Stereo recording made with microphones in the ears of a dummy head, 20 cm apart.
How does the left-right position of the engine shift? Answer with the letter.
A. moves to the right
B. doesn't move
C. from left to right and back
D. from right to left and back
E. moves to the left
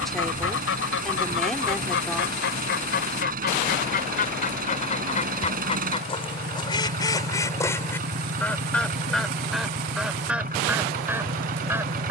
B.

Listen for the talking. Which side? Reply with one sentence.
You can hear the talking in the centre.